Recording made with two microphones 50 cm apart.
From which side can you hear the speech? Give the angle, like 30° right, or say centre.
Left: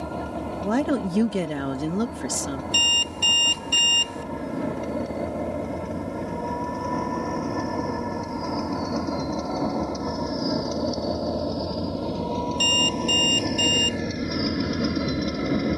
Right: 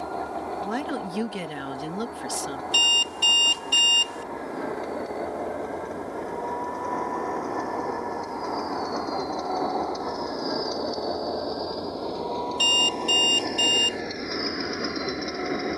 70° left.